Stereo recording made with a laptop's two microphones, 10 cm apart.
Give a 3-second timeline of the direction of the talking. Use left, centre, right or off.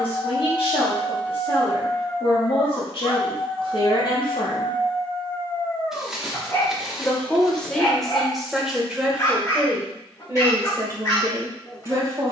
left, left, centre, right.